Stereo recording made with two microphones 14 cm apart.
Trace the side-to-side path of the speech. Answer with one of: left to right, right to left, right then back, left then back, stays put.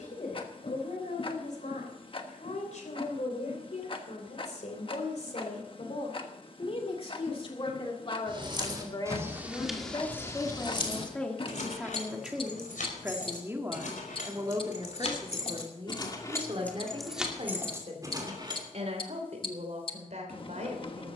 left to right.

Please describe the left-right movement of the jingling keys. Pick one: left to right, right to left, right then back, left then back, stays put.
left then back.